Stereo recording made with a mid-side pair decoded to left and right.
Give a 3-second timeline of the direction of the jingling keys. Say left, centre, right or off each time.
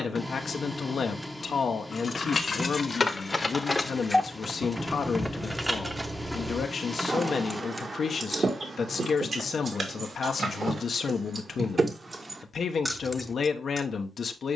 left, centre, right, right, centre.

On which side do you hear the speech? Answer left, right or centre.
left.